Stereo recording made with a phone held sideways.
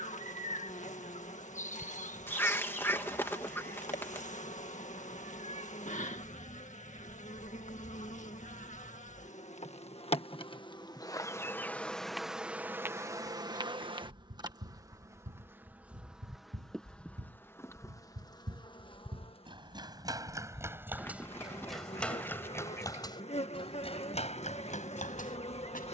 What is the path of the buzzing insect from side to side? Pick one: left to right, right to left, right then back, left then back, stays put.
right then back.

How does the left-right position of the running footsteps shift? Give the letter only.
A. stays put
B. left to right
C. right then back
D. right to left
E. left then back
D.